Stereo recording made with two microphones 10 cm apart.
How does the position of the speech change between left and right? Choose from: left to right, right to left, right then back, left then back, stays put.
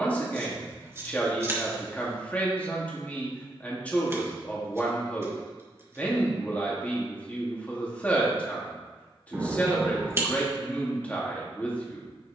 stays put.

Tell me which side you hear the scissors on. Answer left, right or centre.
right.